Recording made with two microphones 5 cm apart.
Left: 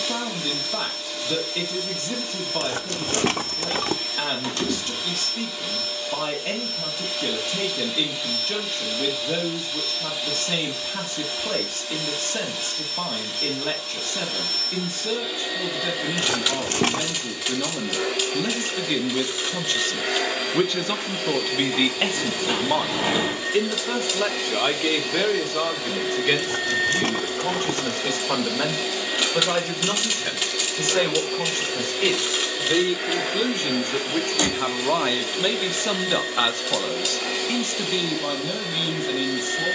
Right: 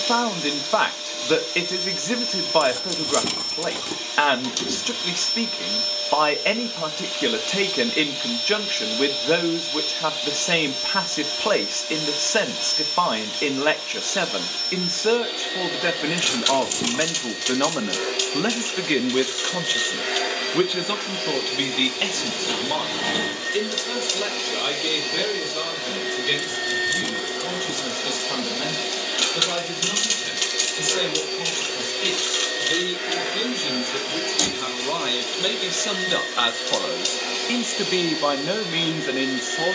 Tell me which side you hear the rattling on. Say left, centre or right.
left.